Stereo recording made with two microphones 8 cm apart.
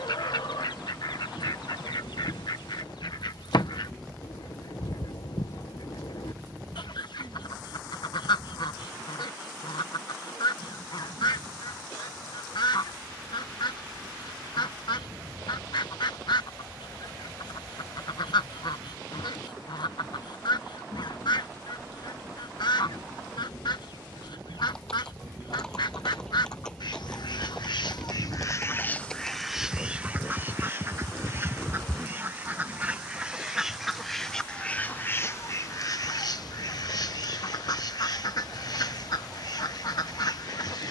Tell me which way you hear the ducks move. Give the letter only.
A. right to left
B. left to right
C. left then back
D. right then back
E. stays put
D.